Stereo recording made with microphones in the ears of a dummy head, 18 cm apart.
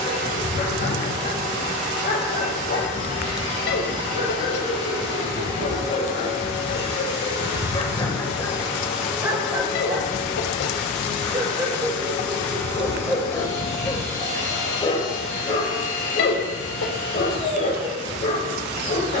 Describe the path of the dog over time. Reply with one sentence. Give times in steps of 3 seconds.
You can hear the dog on the left from 0 s, on the right from 9 s, in the centre from 12 s and on the left from 15 s.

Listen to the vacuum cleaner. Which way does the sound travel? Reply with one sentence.
You can hear the vacuum cleaner go from the right side to the left.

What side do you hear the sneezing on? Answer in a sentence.
In this clip you hear the sneezing on the left.